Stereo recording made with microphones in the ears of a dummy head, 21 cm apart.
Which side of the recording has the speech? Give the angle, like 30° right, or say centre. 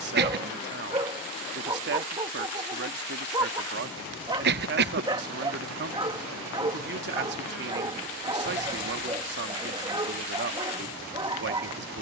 50° right.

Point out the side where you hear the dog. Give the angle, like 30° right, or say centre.
20° right.